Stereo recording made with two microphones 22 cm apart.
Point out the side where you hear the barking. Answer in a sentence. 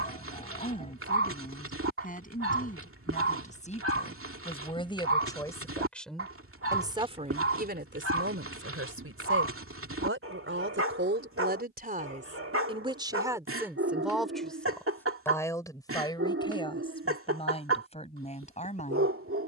In this clip you hear the barking on the right.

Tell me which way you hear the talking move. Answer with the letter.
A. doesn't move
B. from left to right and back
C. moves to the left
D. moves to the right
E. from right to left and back
B.